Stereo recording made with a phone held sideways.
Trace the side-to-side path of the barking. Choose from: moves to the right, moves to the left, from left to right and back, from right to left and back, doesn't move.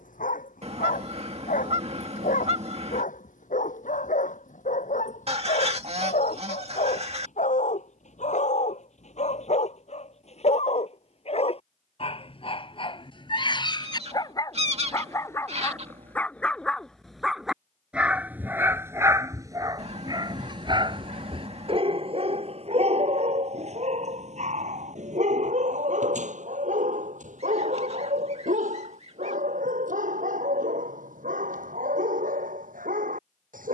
moves to the right.